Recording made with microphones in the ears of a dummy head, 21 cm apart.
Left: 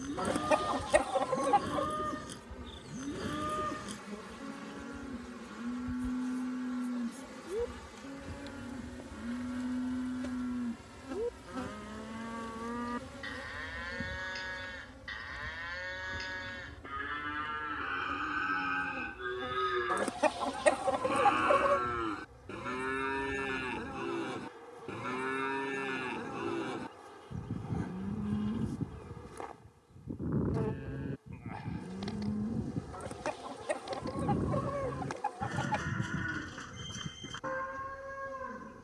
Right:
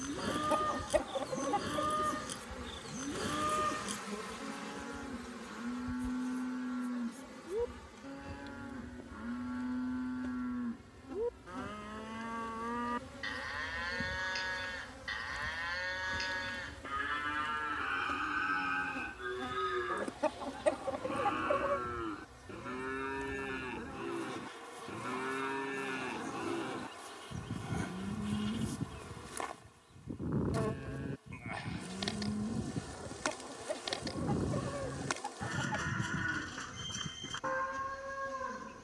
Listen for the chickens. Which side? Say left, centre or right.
left.